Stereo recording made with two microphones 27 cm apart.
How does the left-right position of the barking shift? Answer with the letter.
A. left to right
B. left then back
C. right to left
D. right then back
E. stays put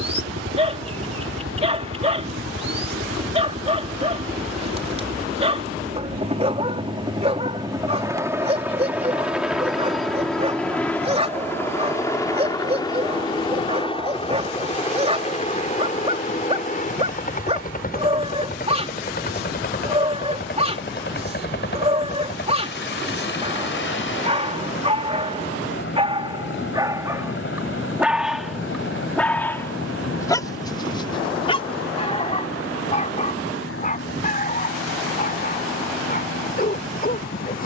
C.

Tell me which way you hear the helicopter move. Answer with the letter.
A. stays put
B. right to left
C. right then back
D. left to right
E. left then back
B.